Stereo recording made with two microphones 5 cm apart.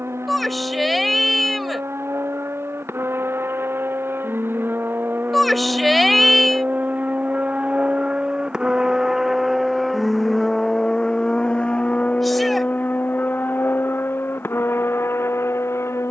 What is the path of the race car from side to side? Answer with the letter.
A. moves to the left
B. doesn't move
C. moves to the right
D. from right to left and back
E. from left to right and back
A.